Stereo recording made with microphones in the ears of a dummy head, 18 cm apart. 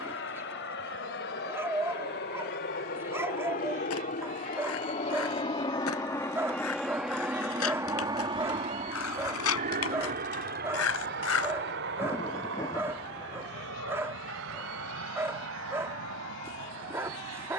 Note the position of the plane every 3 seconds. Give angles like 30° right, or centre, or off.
60° left, 40° left, 10° right, 50° right, 60° right, 70° right.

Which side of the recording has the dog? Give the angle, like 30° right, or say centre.
10° right.